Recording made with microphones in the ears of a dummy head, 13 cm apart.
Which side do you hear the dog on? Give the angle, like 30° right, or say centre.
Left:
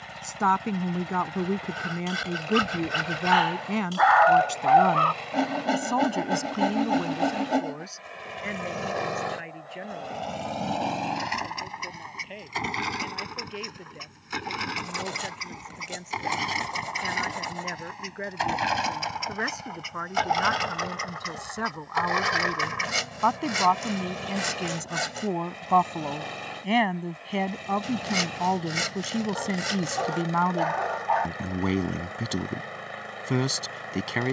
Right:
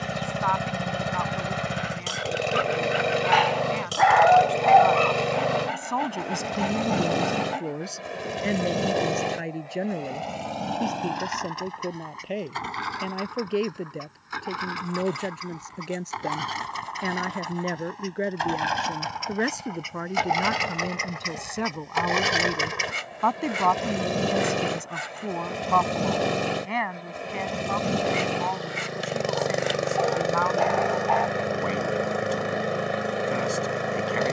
20° right.